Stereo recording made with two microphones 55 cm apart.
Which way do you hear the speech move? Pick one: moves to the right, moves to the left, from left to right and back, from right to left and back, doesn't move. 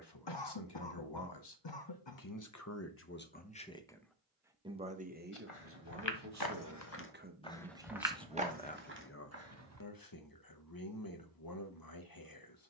from left to right and back.